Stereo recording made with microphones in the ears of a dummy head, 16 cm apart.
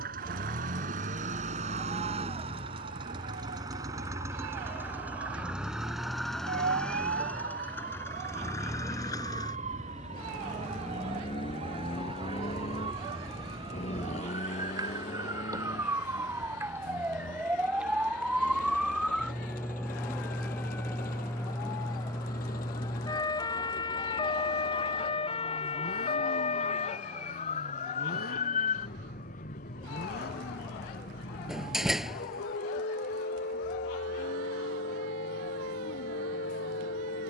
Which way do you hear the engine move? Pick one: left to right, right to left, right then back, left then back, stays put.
right to left.